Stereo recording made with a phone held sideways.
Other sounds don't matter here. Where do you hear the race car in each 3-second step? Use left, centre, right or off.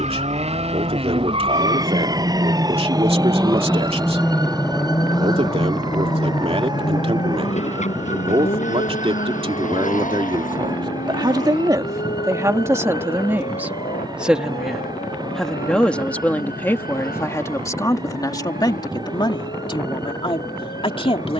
right, centre, left, left, left, left, left.